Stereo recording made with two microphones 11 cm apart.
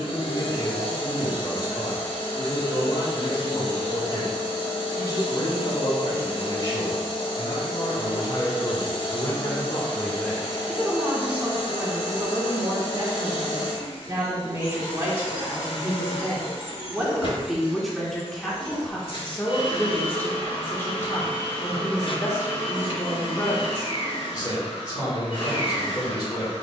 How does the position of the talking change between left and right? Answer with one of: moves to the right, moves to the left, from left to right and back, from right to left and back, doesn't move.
from left to right and back.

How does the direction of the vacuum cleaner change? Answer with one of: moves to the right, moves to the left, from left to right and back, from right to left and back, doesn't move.
doesn't move.